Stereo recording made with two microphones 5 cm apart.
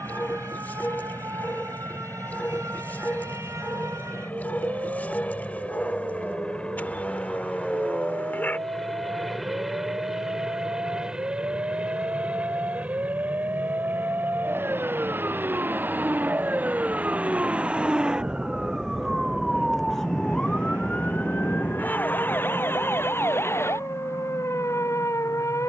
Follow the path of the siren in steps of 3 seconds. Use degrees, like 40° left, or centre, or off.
70° right, 70° right, 60° right, 60° right, 50° right, 30° right, centre, 40° left, 60° left.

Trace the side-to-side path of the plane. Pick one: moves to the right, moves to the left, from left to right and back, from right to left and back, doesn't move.
moves to the right.